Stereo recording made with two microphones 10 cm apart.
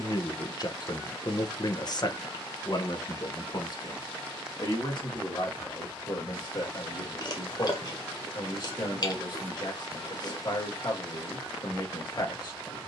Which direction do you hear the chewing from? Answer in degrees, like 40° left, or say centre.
50° left.